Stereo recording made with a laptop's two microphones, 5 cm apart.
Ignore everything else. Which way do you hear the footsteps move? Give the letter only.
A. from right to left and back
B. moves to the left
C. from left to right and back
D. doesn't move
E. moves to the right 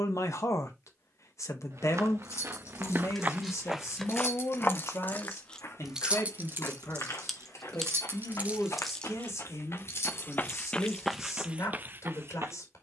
A.